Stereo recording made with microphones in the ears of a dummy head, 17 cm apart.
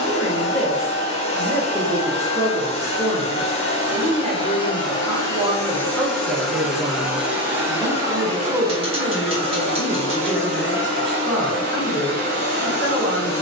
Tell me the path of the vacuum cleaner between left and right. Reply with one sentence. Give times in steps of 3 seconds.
You can hear the vacuum cleaner on the left from 0 s, in the centre from 6 s and on the right from 9 s.